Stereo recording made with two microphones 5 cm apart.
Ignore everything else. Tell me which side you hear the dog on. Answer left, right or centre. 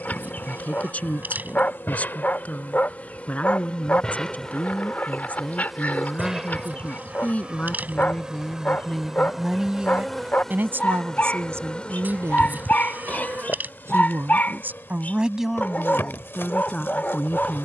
left.